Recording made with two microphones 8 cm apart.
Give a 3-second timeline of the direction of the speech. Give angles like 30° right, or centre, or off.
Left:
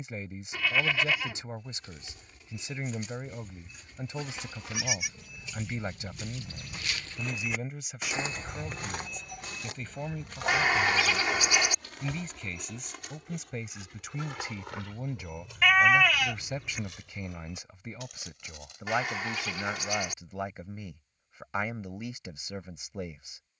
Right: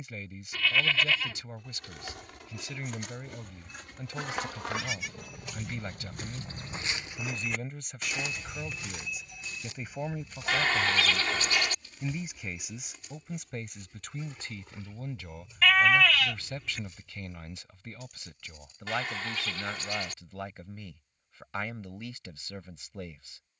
20° left, 20° left, 10° left, 10° right, centre, 20° left, 20° left, 20° left.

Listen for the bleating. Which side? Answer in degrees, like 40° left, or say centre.
20° left.